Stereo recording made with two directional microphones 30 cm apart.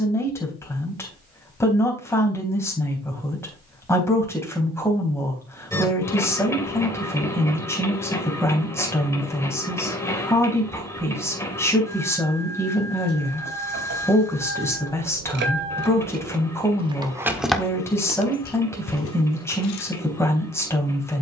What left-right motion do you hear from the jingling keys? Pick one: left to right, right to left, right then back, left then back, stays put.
right to left.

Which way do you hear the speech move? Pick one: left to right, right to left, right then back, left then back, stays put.
stays put.